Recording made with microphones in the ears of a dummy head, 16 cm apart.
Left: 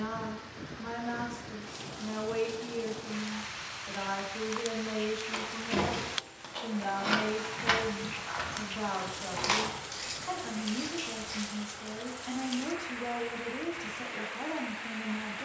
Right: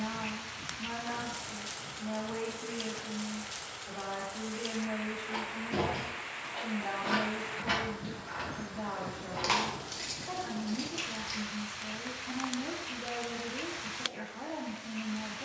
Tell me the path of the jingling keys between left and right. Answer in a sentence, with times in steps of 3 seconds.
In this clip you hear the jingling keys not at all from 0 s, on the left from 3 s, in the centre from 9 s and not at all from 12 s.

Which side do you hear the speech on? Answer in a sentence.
In this clip you hear the speech on the left.